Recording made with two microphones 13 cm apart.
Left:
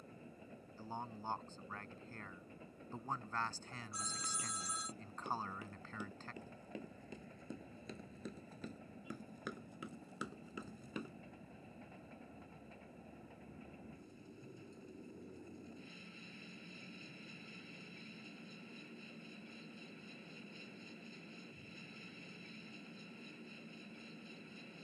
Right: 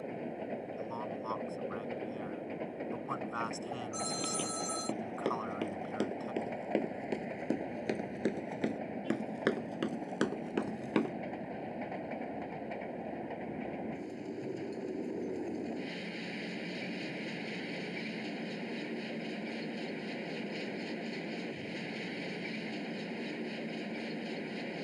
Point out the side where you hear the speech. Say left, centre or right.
centre.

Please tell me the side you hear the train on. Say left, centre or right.
right.